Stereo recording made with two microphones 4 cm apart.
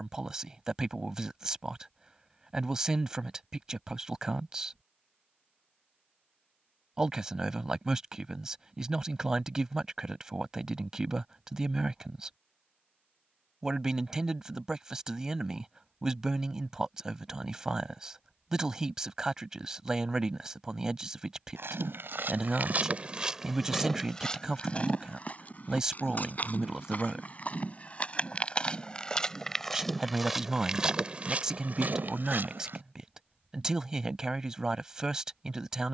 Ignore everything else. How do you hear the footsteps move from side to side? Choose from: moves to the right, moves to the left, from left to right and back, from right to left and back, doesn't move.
from right to left and back.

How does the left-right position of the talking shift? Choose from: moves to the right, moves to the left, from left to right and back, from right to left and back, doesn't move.
doesn't move.